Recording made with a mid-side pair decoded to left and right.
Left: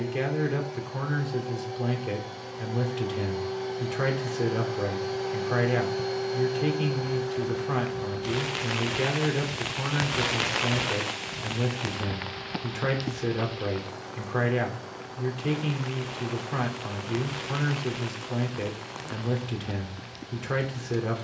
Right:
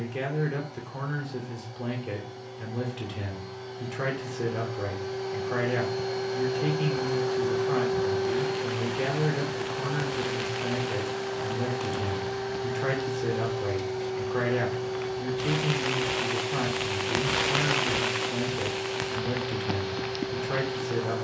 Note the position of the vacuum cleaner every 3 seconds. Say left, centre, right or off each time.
left, left, right, right, right, right, right.